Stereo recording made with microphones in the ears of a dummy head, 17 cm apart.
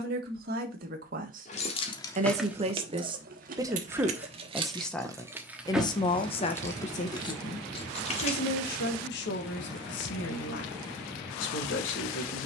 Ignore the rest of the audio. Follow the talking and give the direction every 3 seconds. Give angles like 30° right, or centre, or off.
40° right, centre, 40° left, 70° left.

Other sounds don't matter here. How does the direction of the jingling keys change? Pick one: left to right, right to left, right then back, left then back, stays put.
right then back.